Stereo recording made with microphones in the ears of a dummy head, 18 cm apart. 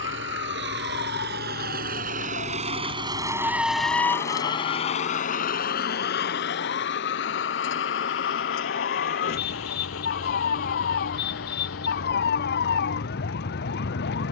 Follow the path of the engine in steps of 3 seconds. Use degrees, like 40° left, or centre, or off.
50° right, 20° left, 60° left, 80° left, 80° left.